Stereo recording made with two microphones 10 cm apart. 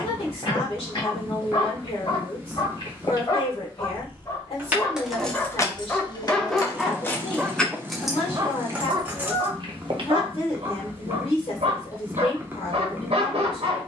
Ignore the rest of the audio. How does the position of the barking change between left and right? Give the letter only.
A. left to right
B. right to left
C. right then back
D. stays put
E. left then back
A.